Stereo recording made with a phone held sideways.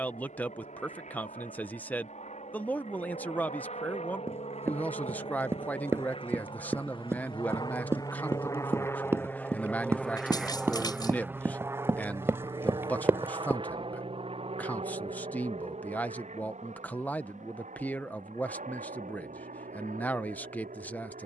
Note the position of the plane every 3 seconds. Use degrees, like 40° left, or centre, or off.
70° left, 60° left, 30° left, centre, 40° right, 50° right, 60° right.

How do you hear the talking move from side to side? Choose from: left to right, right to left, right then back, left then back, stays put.
stays put.